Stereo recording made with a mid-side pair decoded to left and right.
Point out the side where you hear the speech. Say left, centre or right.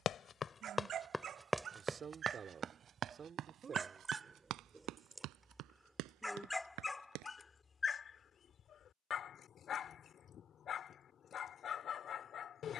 right.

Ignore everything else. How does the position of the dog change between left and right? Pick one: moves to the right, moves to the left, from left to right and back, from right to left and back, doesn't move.
moves to the left.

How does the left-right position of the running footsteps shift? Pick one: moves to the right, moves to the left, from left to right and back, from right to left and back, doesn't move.
moves to the right.